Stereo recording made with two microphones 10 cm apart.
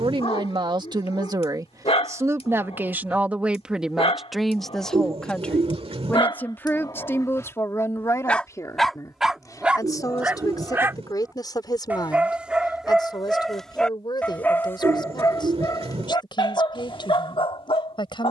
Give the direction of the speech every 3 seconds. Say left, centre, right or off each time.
right, centre, left, left, left, left.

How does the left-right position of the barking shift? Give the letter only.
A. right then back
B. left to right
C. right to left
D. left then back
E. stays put
A.